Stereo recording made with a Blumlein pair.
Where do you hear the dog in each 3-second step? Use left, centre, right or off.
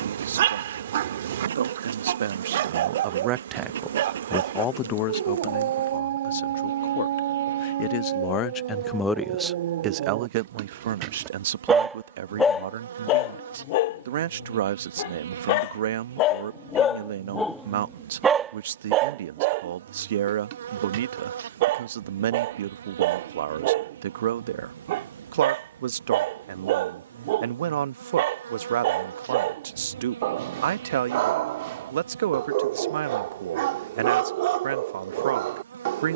right, right, right, right, left, left, right, right, right, right, right, right.